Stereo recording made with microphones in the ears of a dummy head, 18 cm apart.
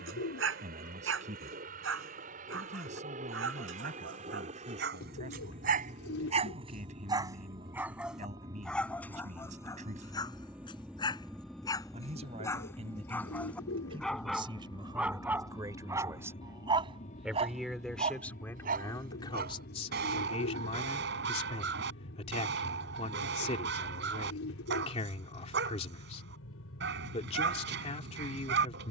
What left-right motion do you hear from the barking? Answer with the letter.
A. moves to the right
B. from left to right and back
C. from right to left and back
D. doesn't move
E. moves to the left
C.